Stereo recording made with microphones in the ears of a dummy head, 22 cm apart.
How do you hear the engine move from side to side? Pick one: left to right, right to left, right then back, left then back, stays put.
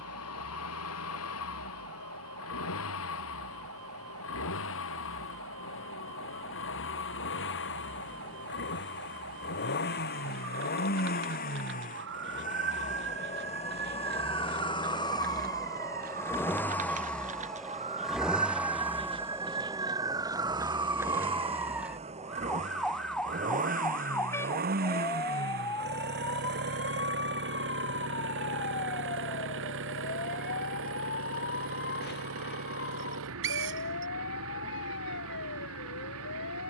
left to right.